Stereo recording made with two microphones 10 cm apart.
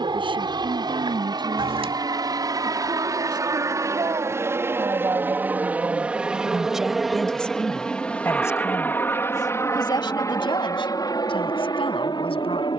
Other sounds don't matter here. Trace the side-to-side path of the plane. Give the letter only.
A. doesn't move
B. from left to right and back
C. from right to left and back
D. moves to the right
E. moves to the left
E.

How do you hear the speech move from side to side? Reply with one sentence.
You can hear the speech move to the left.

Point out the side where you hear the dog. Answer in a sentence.
You can hear the dog on the right.